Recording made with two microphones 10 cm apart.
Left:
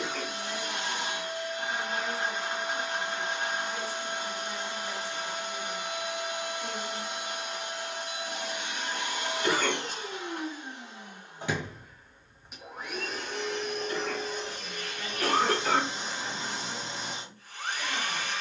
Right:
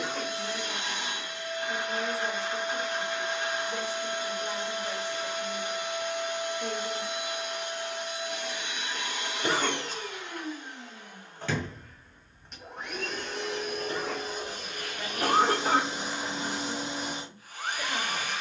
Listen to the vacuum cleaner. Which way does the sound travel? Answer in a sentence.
You can hear the vacuum cleaner move from left to right.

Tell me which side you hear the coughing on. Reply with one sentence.
In this clip you hear the coughing on the right.